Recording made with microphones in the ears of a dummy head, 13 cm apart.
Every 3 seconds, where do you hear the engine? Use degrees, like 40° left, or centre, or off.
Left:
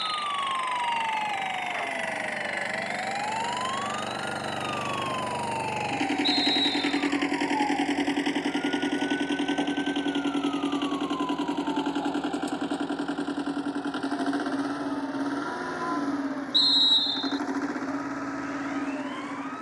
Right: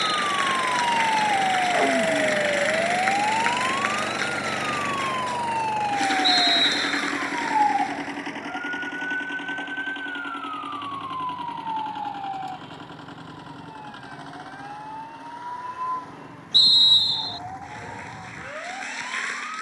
30° right, 10° right, 20° left, 40° left, 60° left, 60° left, 70° left.